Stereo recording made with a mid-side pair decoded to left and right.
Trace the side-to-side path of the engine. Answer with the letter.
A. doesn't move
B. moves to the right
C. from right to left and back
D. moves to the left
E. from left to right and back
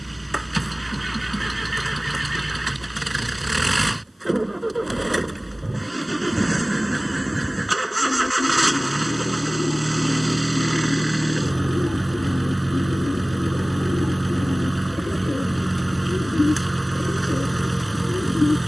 A.